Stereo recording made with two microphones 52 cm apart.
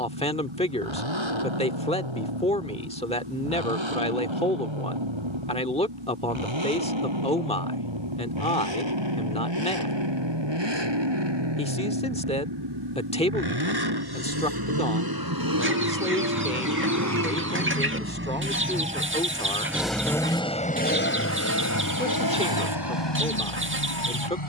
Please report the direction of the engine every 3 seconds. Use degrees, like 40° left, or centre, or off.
60° right, 60° right, 60° right, 50° right, 50° right, 40° right, centre, 40° left.